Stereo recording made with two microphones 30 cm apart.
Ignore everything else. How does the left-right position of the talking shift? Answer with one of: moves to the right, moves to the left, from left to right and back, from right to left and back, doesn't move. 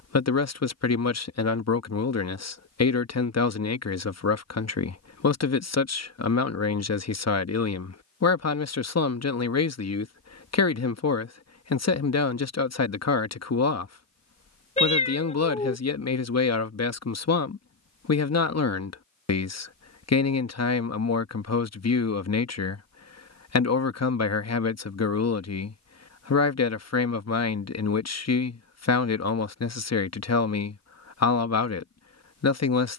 doesn't move.